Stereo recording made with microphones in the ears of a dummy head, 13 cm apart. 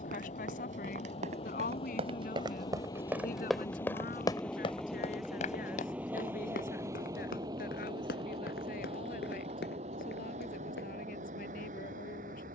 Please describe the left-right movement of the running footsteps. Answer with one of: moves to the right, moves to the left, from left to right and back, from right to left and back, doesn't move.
moves to the left.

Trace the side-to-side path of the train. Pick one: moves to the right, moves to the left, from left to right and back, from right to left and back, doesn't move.
moves to the right.